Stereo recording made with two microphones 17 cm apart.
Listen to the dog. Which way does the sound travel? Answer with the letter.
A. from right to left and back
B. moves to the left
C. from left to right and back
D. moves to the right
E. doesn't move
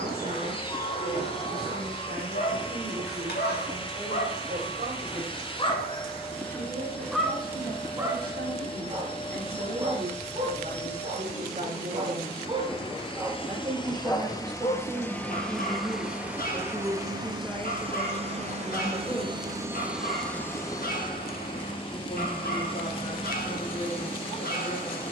C.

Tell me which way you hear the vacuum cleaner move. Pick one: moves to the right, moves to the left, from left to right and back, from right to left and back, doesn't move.
from left to right and back.